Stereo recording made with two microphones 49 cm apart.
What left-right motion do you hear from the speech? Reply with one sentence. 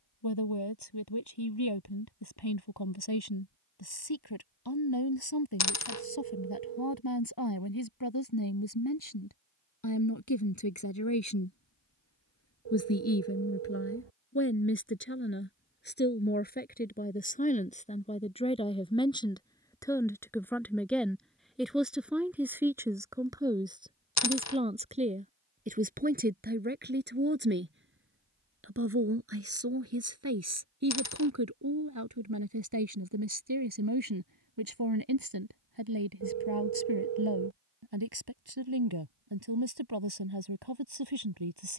In this clip you hear the speech move to the right.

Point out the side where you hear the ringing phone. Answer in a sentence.
You can hear the ringing phone on the right.